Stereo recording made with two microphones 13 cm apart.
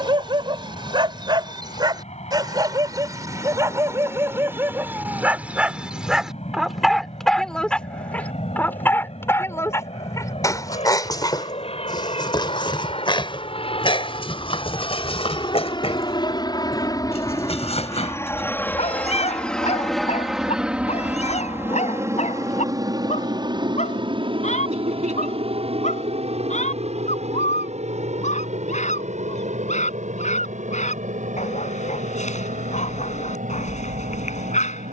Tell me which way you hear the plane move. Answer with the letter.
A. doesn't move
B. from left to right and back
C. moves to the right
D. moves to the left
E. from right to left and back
C.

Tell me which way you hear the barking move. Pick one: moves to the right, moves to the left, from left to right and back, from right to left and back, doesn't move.
moves to the left.